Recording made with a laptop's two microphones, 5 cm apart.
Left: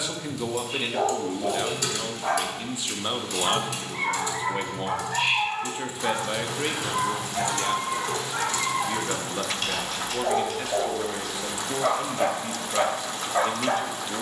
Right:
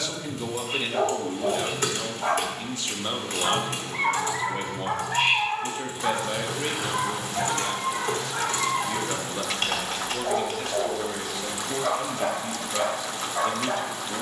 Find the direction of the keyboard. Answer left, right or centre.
right.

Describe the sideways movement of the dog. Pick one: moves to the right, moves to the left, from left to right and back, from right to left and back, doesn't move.
moves to the left.